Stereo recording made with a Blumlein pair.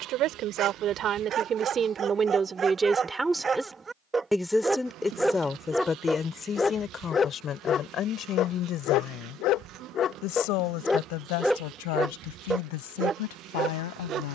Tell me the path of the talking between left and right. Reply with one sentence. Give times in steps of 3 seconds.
You can hear the talking on the right from 0 s, in the centre from 3 s and on the left from 6 s.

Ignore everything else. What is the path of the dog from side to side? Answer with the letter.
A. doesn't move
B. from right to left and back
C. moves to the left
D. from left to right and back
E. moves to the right
B.